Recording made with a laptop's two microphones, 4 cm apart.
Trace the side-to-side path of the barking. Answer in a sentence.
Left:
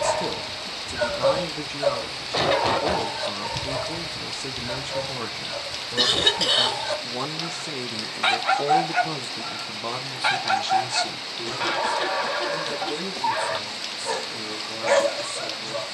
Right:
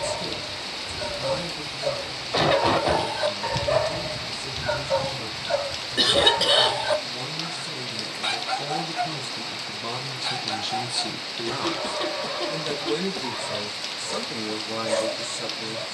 You can hear the barking go right and come back.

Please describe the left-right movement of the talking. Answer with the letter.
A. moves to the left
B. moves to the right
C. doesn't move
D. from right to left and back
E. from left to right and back
B.